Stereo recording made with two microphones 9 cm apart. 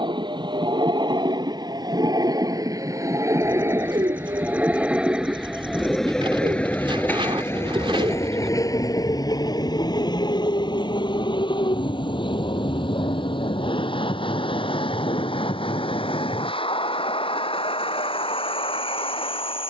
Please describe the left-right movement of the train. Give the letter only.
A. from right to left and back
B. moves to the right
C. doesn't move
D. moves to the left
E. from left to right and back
D.